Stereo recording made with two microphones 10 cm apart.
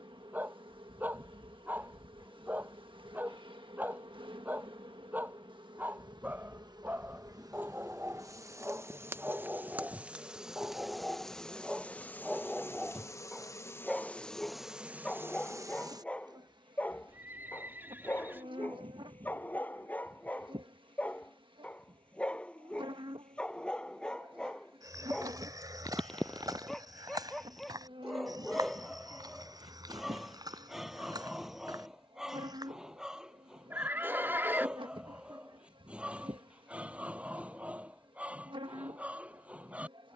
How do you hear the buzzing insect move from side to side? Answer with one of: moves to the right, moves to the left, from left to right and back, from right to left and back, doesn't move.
from right to left and back.